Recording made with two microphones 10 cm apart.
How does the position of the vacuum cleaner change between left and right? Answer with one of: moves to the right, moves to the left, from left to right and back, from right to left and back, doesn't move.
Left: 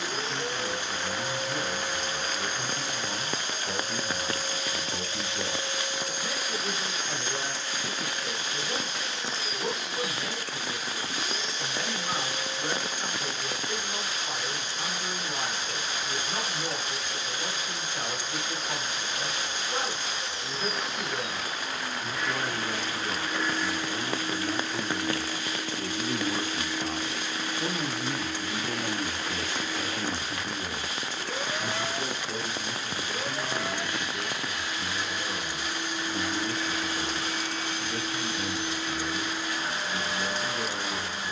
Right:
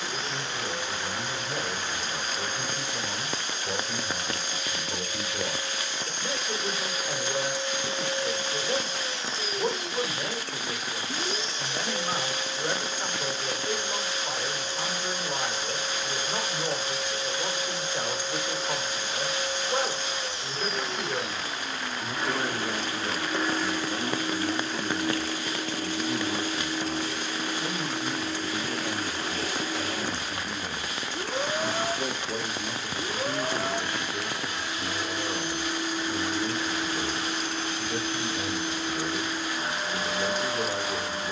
moves to the right.